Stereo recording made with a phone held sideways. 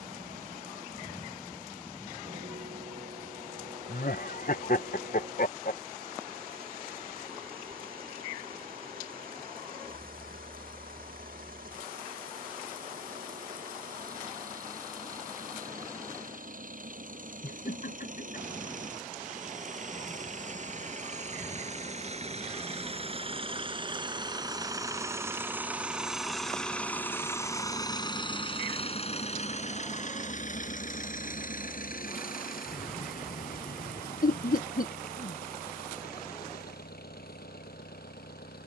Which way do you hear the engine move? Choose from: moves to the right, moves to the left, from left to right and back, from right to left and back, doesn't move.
moves to the left.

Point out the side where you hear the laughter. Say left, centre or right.
left.